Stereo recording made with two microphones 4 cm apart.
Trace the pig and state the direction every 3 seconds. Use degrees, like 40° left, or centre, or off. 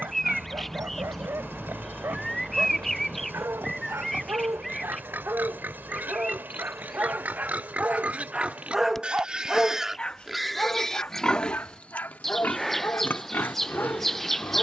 60° right, 50° right, 40° right, centre, 50° left.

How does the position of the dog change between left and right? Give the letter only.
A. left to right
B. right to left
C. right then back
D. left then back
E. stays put
B.